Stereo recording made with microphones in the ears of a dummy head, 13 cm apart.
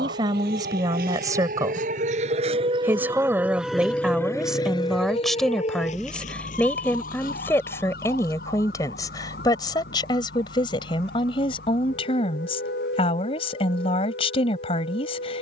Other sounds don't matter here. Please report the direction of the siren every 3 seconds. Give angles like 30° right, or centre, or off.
60° right, 20° left, 60° left, 70° left, 70° left.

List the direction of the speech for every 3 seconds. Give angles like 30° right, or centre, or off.
20° right, centre, 20° left, 30° left, 40° left.